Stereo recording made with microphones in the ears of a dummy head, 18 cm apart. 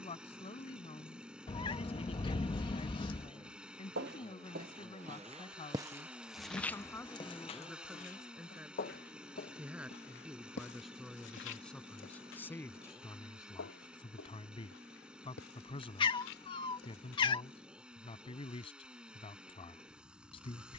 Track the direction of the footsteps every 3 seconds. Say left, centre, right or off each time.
off, right, left, left, left, left, off.